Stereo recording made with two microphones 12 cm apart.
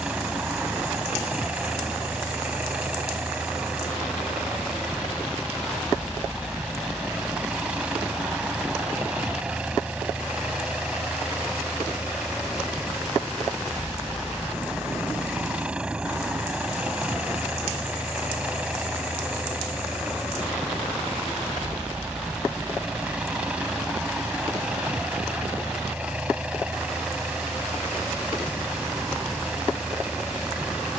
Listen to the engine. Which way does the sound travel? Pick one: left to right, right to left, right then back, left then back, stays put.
stays put.